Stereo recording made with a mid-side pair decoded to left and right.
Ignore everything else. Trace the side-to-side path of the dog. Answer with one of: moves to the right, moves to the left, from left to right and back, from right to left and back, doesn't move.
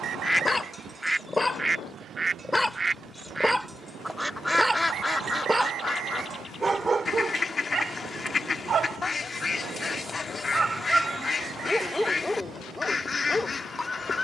from left to right and back.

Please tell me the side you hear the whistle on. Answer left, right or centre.
right.